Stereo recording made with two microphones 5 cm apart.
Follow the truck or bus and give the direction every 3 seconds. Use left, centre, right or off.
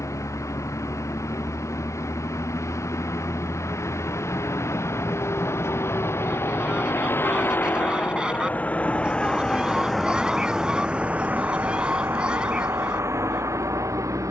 left, left, left, centre, right.